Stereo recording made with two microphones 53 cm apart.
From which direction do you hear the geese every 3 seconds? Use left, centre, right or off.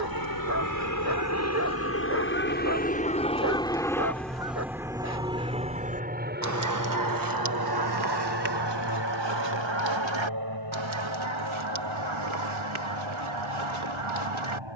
centre, centre, right, right, right.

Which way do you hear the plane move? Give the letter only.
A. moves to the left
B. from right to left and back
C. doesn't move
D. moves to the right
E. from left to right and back
D.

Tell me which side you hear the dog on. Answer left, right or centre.
right.